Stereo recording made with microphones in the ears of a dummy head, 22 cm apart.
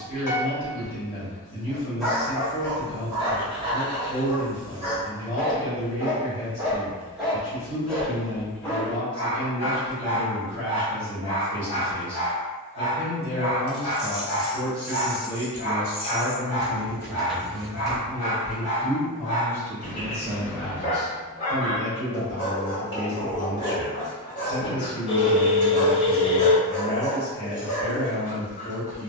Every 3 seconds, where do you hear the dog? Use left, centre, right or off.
centre, right, centre, left, left, left, left, left, left, left.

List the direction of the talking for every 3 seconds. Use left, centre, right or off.
left, left, left, left, left, centre, centre, left, left, left.